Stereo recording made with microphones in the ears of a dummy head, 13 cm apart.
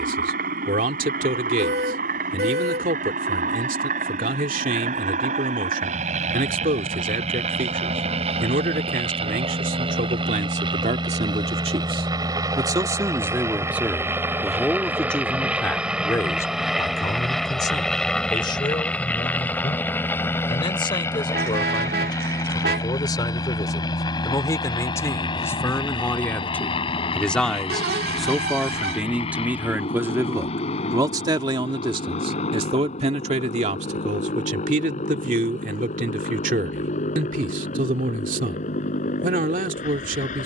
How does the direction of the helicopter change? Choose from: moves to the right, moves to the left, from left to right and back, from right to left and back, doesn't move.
moves to the left.